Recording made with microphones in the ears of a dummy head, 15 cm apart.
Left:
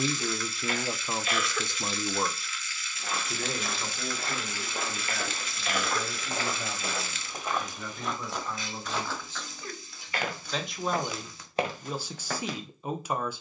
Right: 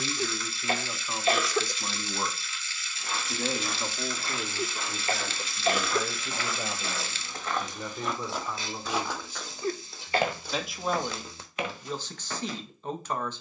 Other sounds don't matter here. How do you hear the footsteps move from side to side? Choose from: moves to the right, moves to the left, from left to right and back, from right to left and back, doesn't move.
from left to right and back.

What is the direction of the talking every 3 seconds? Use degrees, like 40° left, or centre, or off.
20° left, 10° right, 20° right, centre, 10° left.